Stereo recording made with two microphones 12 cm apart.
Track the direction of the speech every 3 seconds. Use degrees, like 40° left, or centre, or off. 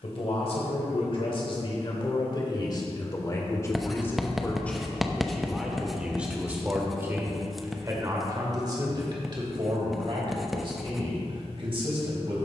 50° left, 10° left, 20° right, 50° right.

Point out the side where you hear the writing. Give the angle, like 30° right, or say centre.
centre.